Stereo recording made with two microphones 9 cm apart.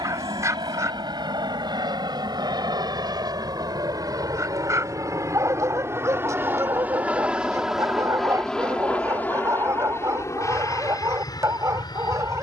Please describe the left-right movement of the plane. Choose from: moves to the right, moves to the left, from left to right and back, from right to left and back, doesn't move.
moves to the left.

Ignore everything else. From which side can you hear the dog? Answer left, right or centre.
right.